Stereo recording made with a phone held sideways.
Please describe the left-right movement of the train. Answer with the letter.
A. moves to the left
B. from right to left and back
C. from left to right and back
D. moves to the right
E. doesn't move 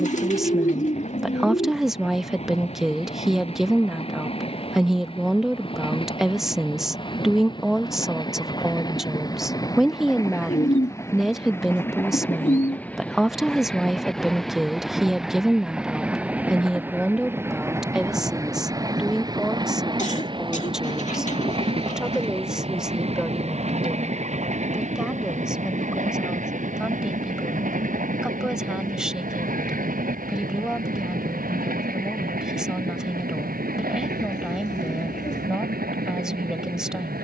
D.